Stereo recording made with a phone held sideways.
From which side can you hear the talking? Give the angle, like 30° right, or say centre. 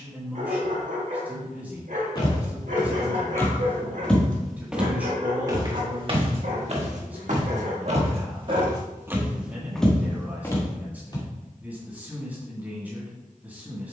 10° right.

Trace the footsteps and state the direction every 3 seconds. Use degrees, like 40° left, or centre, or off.
30° left, centre, 50° right, 10° left, off.